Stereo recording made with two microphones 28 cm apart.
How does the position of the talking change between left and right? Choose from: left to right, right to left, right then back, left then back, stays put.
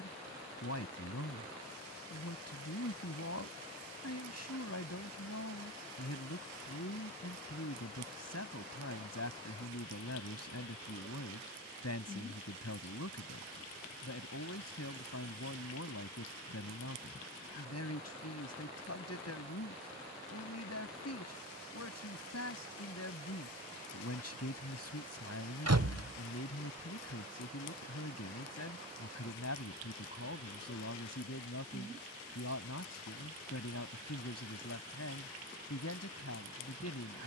stays put.